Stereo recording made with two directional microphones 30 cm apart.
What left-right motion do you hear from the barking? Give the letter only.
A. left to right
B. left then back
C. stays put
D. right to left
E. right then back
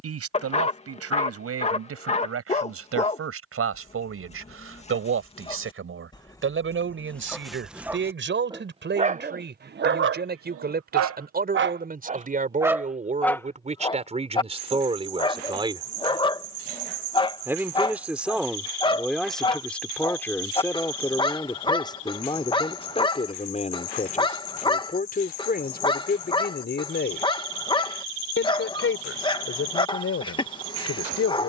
E.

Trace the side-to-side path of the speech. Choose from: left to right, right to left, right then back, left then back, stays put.
right to left.